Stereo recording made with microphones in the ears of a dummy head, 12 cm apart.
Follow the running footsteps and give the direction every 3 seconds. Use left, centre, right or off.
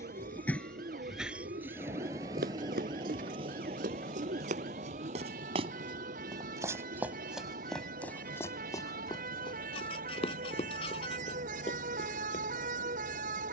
right, right, centre, left, off.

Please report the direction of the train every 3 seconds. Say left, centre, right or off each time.
centre, right, right, right, right.